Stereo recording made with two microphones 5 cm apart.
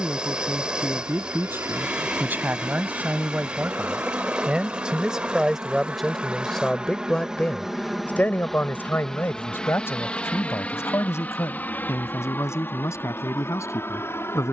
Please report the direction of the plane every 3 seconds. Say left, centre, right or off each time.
right, right, centre, left, left.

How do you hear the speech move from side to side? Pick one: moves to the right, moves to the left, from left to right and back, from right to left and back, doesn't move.
moves to the left.